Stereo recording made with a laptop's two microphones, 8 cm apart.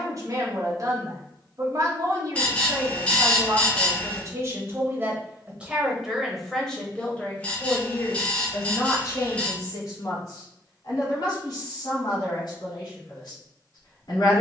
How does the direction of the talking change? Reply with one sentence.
In this clip you hear the talking move from right to left.